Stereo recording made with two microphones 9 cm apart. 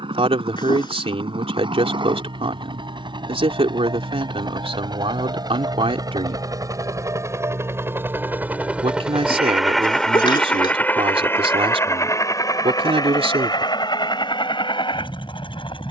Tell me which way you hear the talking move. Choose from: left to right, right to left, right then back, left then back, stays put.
stays put.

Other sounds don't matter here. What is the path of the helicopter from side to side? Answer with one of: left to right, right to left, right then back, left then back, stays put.
right to left.